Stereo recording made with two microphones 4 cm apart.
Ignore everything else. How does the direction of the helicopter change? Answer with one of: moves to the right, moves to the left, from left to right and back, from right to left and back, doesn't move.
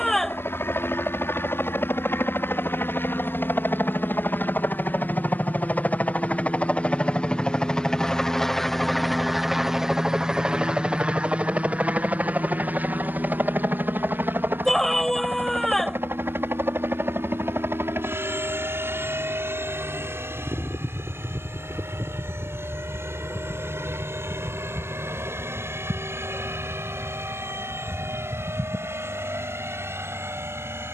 moves to the right.